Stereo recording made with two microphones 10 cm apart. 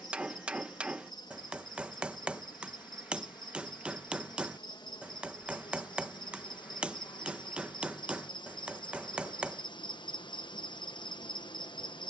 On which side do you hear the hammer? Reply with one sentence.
In this clip you hear the hammer in the centre.